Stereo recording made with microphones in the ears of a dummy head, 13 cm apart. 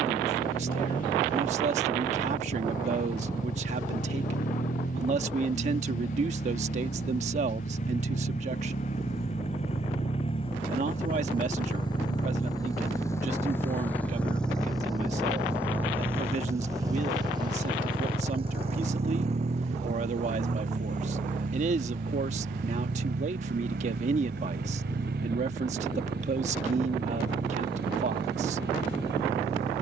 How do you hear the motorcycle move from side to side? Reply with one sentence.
In this clip you hear the motorcycle move from left to right.